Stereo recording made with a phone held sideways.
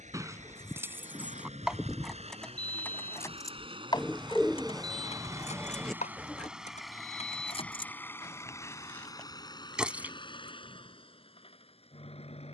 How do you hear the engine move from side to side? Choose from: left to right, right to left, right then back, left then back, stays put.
right to left.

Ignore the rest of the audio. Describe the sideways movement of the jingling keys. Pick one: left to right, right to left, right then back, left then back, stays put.
left then back.